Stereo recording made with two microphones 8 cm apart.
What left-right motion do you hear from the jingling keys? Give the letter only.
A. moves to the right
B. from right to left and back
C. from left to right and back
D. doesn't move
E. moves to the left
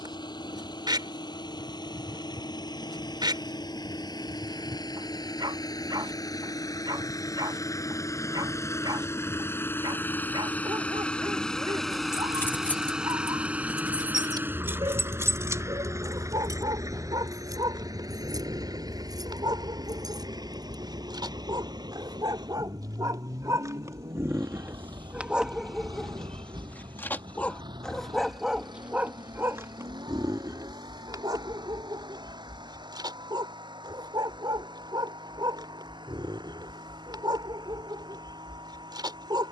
A.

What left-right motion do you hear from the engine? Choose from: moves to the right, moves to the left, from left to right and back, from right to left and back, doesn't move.
moves to the right.